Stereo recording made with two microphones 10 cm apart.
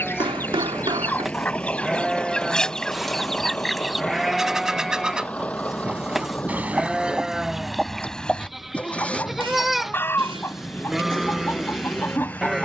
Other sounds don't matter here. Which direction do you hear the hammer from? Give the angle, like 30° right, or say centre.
60° right.